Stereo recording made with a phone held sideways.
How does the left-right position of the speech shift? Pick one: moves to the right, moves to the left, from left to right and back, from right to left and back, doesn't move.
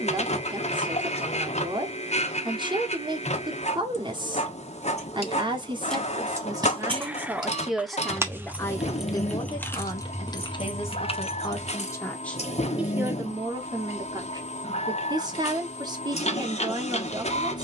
from right to left and back.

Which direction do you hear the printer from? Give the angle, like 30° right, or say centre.
50° left.